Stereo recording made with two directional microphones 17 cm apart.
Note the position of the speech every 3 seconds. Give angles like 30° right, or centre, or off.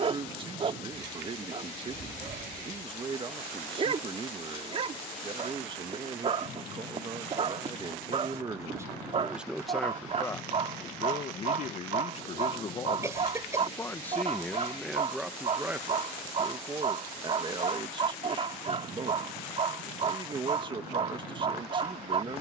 30° right, 30° right, 30° right, 20° left, 20° left, 20° right, 30° right, 30° right.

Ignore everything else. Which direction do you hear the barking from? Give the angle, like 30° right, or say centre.
40° right.